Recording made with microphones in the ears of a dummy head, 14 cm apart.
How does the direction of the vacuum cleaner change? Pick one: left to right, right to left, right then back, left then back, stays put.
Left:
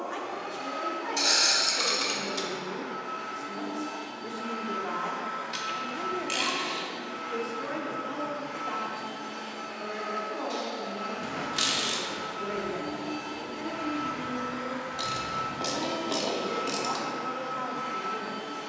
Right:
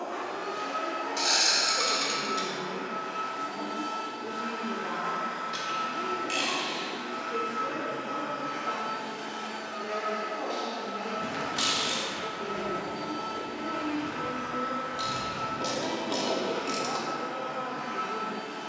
right to left.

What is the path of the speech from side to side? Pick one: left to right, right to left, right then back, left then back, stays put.
stays put.